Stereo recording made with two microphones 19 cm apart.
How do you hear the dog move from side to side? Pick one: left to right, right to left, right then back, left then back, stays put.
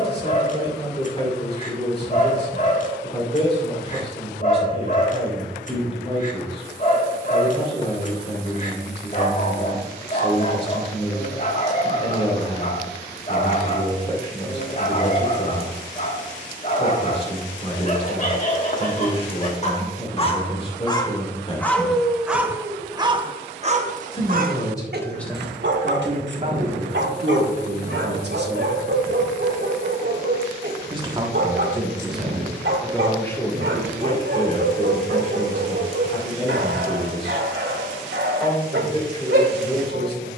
left to right.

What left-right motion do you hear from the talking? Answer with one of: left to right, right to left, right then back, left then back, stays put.
right then back.